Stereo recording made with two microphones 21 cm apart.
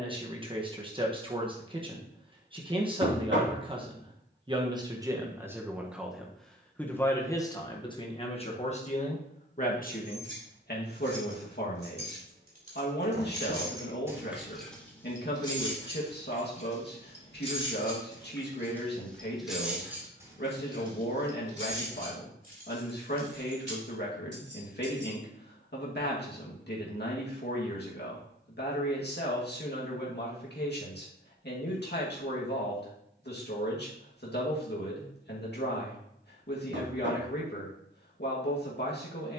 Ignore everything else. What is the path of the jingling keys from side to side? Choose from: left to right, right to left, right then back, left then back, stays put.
left then back.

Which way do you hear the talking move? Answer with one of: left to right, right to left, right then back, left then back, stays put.
right to left.